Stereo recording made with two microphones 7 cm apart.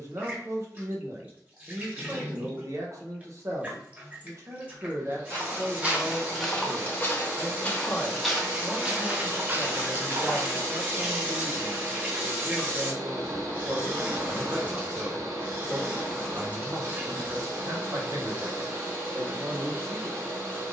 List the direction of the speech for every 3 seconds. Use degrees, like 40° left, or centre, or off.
40° right, 40° right, centre, 10° right, 40° right, 40° right, 40° right.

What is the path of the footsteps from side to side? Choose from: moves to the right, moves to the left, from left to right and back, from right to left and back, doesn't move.
from right to left and back.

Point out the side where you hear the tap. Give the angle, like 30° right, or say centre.
20° right.